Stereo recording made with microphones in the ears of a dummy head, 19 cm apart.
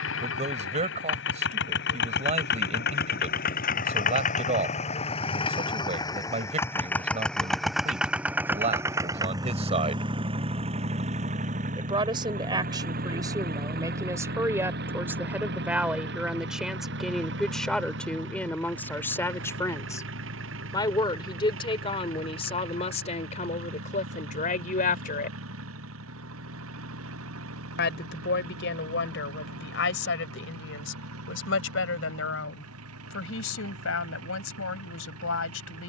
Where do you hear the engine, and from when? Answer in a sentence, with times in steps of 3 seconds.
In this clip you hear the engine on the left from 0 s, in the centre from 6 s and on the right from 9 s.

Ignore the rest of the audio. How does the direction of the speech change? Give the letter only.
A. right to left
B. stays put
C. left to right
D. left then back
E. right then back
A.